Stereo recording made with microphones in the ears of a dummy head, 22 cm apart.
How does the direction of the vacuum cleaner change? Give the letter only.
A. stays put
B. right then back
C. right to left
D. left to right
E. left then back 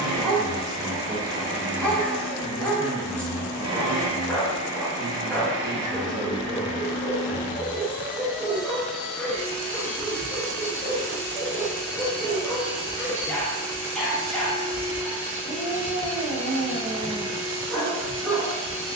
C.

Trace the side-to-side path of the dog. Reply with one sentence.
You can hear the dog stay in one place.